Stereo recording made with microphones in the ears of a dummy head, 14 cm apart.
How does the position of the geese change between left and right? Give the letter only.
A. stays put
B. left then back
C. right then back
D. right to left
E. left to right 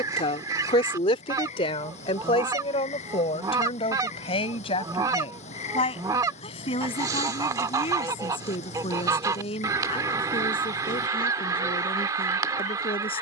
A.